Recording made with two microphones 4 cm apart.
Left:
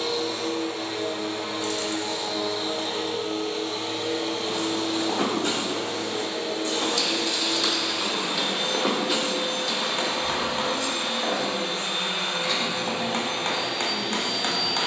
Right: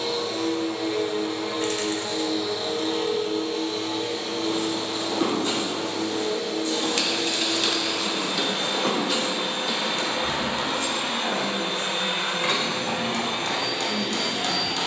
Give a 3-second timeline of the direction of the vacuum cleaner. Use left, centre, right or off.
left, left, centre, right, right.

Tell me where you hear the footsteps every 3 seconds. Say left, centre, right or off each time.
off, left, left, centre, off.